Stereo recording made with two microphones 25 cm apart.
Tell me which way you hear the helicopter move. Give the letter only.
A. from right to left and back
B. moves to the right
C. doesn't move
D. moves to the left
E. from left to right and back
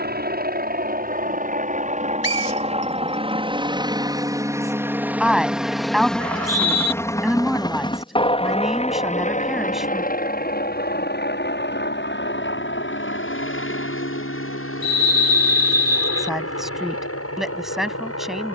D.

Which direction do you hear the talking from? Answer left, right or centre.
centre.